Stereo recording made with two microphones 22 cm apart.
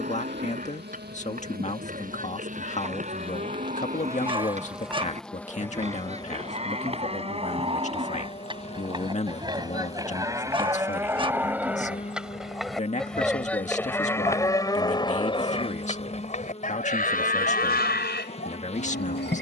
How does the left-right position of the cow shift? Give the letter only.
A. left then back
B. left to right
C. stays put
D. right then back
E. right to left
E.